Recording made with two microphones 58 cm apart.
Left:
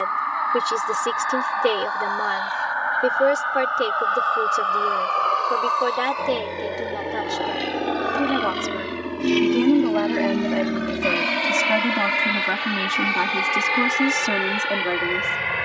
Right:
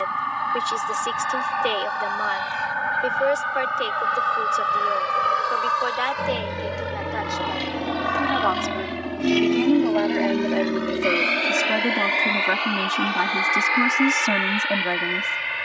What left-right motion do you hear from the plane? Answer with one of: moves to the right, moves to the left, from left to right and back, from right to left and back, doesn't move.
moves to the left.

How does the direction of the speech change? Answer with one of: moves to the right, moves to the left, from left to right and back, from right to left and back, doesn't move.
moves to the right.